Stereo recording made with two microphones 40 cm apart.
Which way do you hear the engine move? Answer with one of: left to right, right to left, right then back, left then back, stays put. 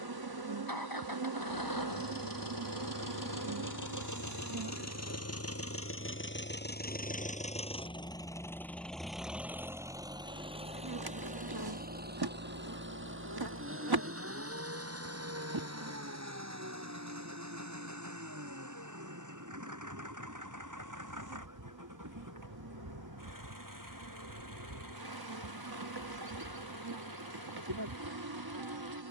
left to right.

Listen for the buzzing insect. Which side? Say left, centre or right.
right.